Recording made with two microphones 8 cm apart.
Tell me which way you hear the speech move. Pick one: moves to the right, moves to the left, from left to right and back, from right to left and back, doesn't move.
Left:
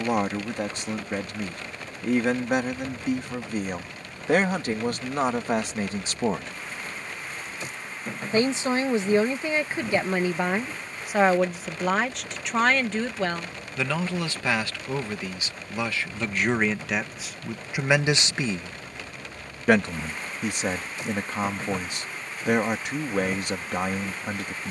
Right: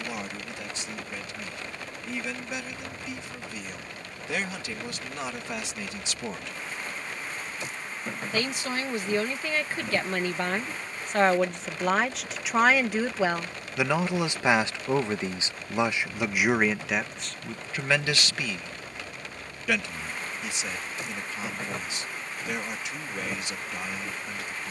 from left to right and back.